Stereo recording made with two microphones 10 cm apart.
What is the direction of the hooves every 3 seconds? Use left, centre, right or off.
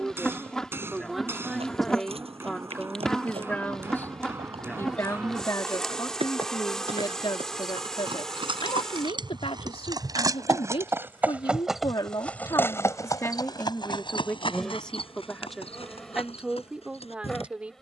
right, right, right, right, left, left.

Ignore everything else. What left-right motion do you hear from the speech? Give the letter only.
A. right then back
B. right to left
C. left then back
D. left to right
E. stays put
C.